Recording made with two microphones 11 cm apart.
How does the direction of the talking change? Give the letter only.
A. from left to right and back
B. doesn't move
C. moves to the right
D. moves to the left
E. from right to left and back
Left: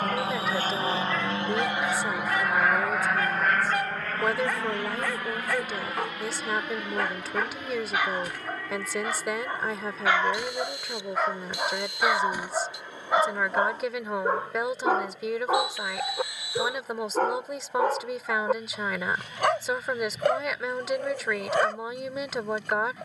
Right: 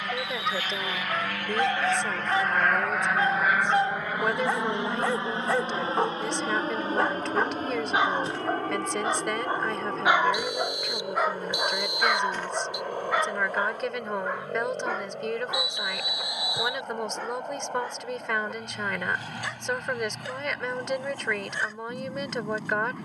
B.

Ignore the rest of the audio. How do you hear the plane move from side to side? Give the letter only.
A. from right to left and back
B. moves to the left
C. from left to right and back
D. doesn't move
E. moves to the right
E.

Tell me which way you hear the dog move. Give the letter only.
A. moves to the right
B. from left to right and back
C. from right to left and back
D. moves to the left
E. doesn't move
D.